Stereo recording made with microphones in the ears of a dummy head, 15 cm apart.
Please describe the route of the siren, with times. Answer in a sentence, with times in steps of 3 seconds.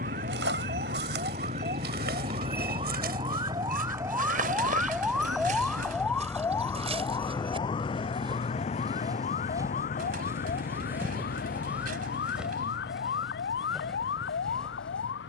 You can hear the siren on the right from 0 s, in the centre from 3 s and on the left from 6 s.